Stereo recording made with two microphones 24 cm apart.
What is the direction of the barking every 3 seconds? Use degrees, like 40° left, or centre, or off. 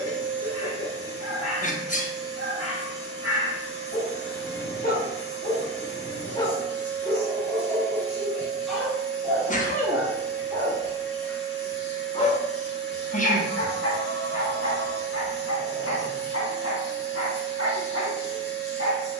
70° left, 40° left, 10° left, centre, 50° left, 70° left, 70° left.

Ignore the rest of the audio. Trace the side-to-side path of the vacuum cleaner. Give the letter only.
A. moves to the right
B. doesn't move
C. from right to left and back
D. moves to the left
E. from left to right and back
B.